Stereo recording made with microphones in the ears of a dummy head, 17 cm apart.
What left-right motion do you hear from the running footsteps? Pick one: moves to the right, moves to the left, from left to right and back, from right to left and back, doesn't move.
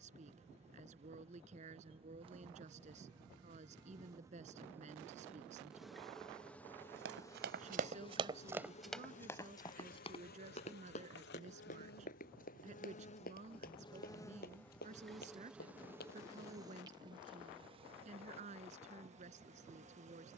moves to the left.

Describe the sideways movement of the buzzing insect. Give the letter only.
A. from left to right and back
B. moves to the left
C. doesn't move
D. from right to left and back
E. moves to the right
D.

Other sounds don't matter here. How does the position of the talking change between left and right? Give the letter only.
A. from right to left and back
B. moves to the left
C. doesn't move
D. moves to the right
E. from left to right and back
C.